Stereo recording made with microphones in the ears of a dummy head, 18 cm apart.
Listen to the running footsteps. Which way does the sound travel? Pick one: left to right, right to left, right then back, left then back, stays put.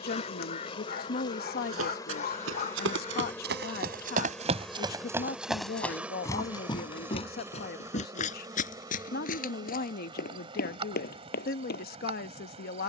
right to left.